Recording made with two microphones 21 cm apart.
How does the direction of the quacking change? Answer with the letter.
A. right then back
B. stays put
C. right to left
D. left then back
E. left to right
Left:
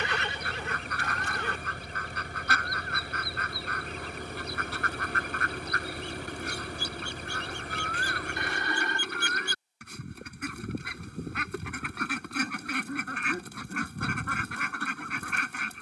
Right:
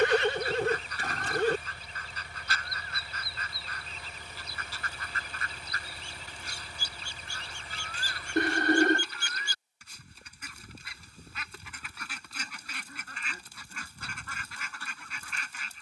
B.